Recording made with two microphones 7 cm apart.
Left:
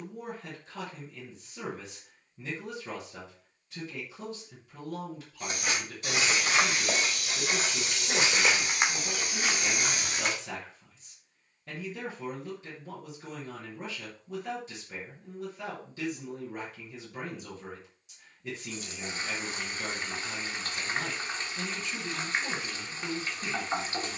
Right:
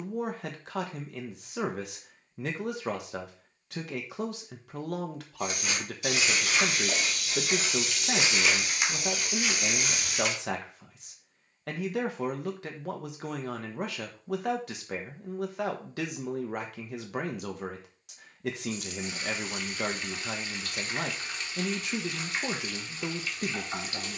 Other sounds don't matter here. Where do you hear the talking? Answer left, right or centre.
right.